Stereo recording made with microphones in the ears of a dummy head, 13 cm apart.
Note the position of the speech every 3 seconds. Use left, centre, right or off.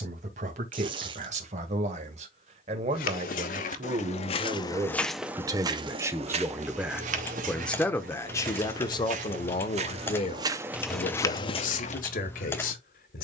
right, right, centre, left, left.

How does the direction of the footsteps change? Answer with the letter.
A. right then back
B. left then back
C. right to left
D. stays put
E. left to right
A.